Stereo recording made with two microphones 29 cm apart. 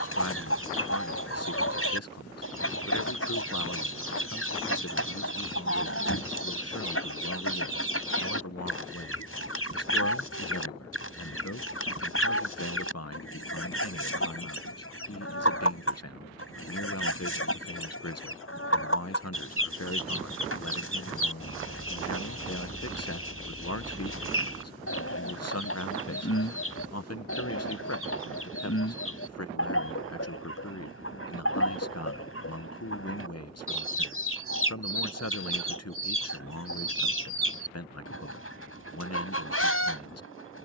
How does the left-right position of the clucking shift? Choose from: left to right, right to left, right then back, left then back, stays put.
stays put.